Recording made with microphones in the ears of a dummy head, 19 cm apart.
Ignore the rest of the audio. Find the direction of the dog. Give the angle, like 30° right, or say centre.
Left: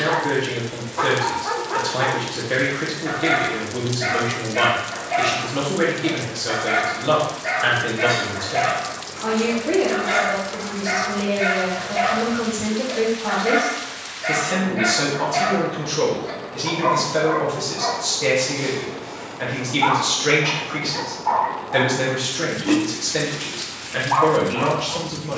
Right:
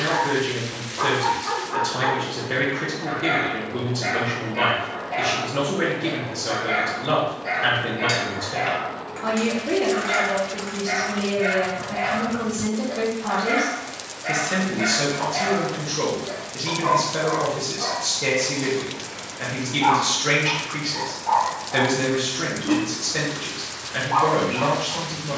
50° left.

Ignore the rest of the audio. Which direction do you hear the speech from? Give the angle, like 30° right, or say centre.
10° left.